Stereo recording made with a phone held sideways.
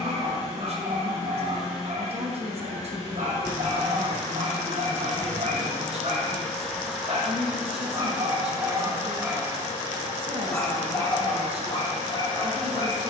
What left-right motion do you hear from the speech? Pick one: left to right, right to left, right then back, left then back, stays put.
stays put.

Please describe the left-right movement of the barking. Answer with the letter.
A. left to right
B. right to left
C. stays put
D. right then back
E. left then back
B.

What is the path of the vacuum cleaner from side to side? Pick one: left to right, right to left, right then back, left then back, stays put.
left to right.